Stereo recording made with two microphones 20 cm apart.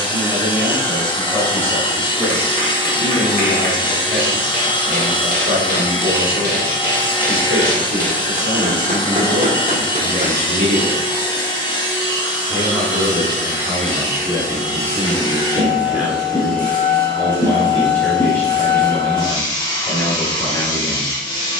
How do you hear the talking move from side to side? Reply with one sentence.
You can hear the talking go right and come back.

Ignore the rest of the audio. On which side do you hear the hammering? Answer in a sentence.
In this clip you hear the hammering on the right.